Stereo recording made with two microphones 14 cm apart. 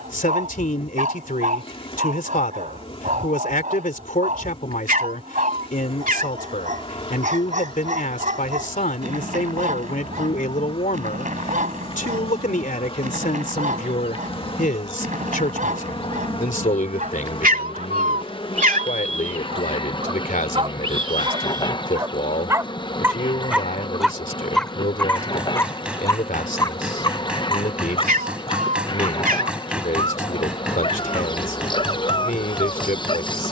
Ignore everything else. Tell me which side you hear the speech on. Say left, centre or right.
left.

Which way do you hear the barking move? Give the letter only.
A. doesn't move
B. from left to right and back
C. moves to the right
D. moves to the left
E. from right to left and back
D.